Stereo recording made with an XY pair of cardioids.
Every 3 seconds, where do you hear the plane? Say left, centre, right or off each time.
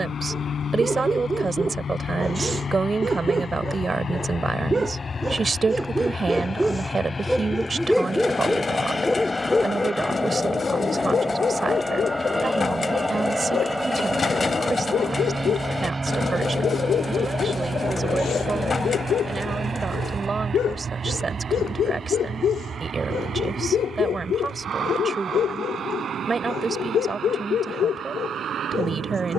left, left, left, centre, centre, right, right, right, right, right.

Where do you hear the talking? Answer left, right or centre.
right.